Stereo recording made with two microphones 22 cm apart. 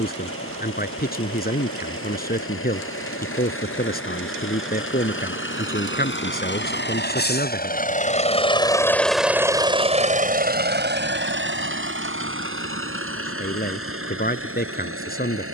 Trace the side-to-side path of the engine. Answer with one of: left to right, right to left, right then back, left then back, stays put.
left to right.